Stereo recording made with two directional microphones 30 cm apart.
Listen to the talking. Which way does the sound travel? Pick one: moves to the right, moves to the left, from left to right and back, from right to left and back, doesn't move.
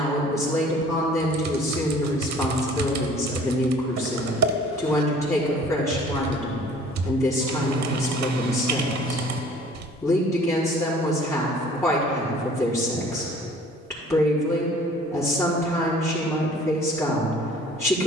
doesn't move.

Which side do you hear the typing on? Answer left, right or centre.
right.